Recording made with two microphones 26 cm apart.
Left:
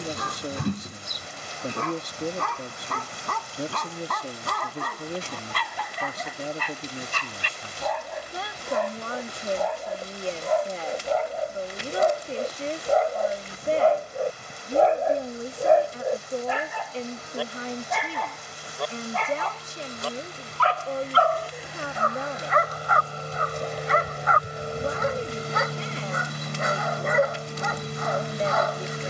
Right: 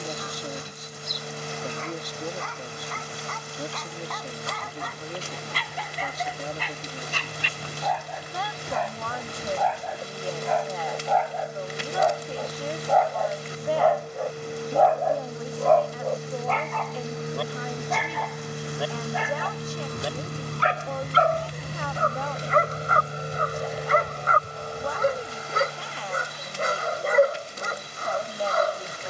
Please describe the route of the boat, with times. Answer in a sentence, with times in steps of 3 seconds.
In this clip you hear the boat on the right from 0 s and on the left from 24 s.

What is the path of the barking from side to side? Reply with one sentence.
You can hear the barking travel towards the right.